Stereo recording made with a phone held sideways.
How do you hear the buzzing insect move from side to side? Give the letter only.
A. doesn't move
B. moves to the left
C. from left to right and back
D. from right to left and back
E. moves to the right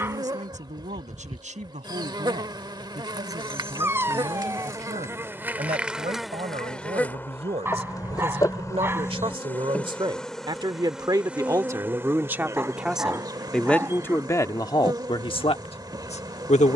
D.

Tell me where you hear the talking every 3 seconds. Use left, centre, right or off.
right, right, right, right, centre, left.